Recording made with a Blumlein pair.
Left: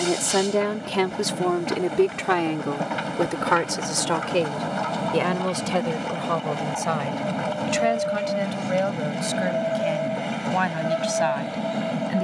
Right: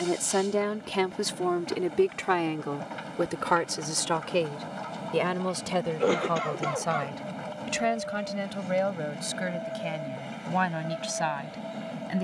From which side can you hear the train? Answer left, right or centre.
left.